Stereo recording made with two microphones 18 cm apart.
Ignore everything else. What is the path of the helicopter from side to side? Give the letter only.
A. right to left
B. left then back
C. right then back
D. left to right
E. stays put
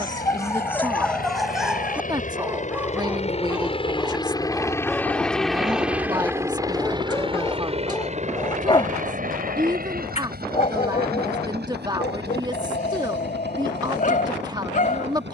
D.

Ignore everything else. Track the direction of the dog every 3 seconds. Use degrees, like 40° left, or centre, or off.
centre, centre, 20° left, 40° left, 50° left.